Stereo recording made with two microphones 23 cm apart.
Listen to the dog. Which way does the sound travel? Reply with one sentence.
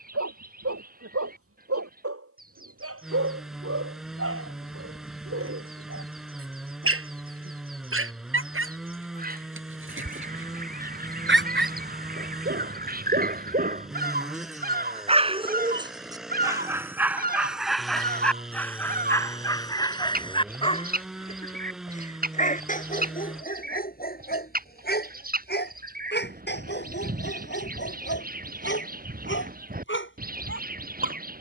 In this clip you hear the dog move from right to left.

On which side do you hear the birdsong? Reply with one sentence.
In this clip you hear the birdsong on the right.